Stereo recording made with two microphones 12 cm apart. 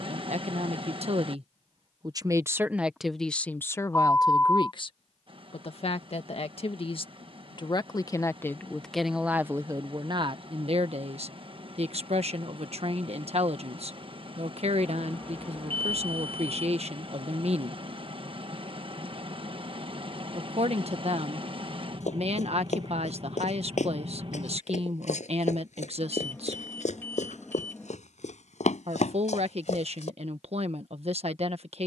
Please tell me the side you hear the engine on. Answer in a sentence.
In this clip you hear the engine on the right.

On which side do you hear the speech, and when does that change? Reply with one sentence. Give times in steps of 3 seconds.
You can hear the speech on the right from 0 s, on the left from 3 s and on the right from 9 s.